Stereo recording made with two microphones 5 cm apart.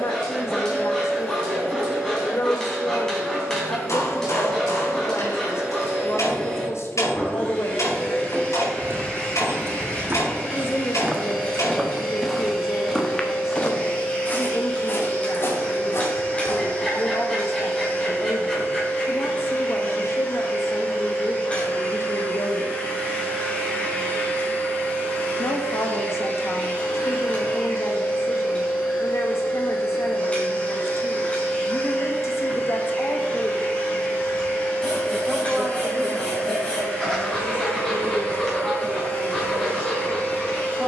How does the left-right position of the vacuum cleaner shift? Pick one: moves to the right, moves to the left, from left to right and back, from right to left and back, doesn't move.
doesn't move.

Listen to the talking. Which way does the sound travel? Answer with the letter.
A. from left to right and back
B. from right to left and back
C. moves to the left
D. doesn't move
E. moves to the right
E.